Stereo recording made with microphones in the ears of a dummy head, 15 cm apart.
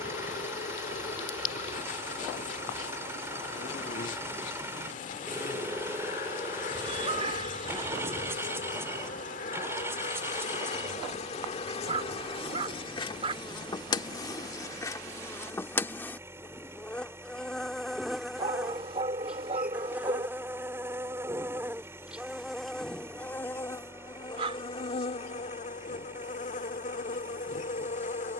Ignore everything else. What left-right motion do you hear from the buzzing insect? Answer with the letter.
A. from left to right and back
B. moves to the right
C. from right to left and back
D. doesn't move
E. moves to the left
A.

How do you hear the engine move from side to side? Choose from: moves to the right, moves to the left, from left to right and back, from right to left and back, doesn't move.
doesn't move.